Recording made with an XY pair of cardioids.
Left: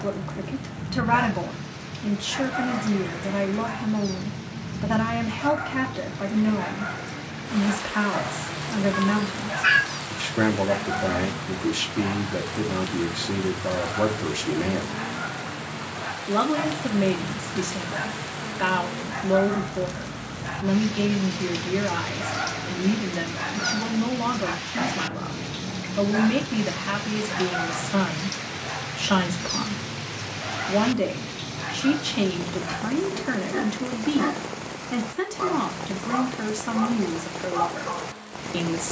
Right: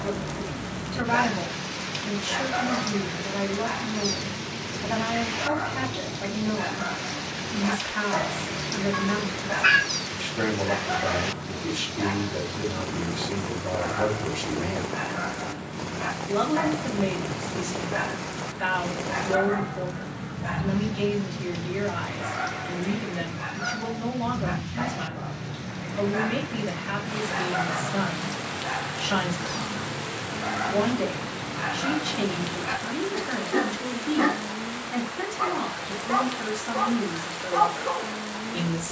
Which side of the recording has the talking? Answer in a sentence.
You can hear the talking on the left.